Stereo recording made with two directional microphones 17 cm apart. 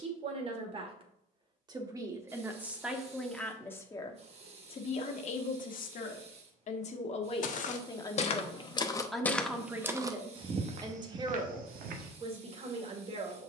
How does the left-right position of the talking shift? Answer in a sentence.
You can hear the talking move from right to left and back again.